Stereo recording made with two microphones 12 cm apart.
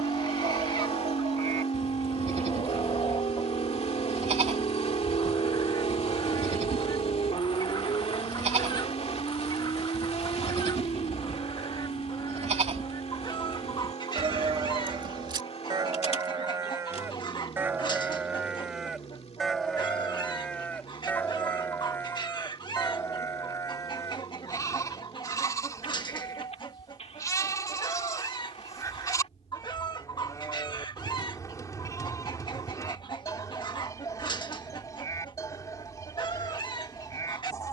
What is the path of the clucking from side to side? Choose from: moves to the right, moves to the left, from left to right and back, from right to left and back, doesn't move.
doesn't move.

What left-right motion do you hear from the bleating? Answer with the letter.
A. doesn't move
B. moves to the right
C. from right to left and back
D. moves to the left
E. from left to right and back
D.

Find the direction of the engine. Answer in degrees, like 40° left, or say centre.
50° left.